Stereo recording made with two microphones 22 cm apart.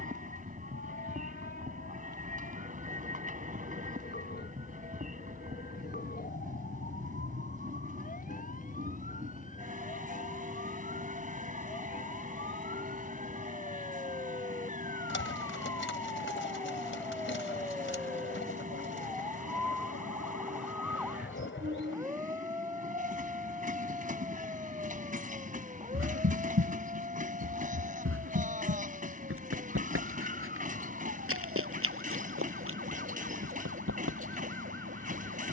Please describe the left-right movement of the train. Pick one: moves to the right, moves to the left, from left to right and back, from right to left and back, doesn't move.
doesn't move.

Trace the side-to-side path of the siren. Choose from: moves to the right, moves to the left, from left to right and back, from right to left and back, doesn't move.
moves to the right.